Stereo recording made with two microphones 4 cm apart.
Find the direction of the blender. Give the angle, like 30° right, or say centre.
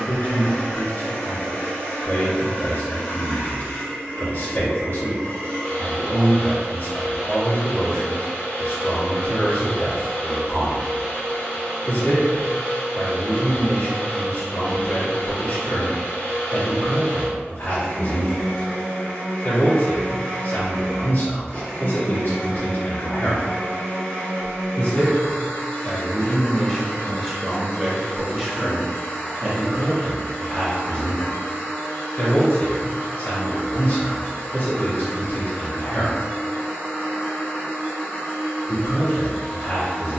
20° left.